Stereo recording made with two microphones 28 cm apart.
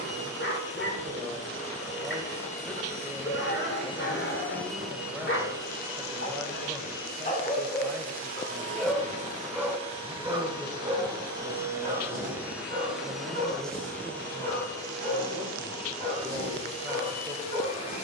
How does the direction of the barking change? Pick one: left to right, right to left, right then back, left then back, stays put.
left to right.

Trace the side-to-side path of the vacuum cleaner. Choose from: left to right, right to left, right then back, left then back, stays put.
right then back.